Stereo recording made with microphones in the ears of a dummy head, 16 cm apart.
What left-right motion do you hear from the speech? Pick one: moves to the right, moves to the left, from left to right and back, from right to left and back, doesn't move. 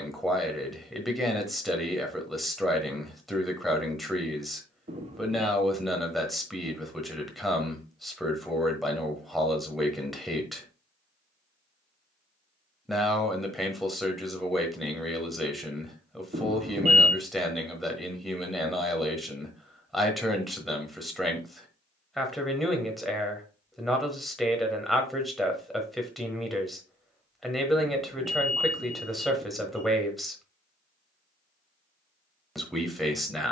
doesn't move.